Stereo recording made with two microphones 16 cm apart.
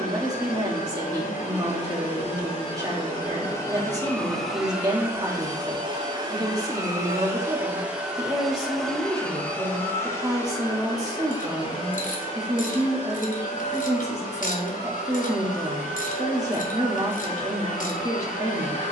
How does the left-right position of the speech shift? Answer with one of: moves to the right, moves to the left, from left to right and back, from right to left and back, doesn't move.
doesn't move.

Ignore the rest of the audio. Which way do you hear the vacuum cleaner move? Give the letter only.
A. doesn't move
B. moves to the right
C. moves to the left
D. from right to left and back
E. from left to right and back
E.